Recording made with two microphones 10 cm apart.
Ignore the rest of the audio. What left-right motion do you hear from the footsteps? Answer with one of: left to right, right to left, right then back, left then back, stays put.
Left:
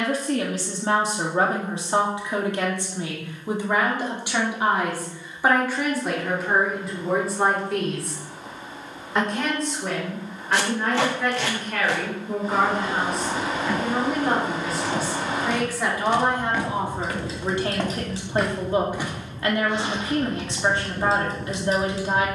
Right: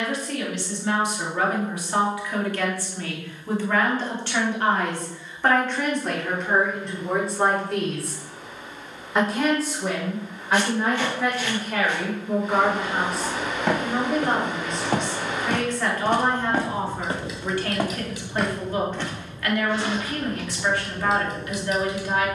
right to left.